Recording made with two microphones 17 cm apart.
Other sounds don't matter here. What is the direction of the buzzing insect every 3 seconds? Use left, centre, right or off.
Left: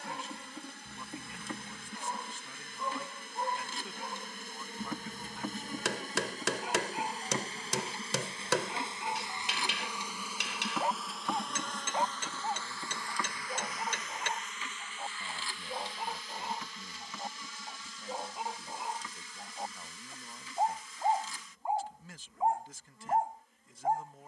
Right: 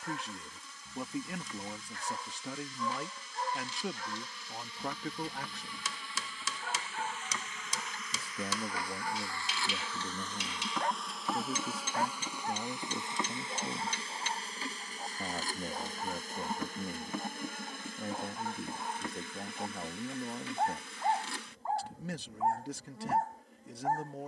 left, left, left, centre, right, right, right, right.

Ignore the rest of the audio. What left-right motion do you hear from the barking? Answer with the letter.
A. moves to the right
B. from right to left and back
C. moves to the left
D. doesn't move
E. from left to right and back
D.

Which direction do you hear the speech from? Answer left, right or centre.
right.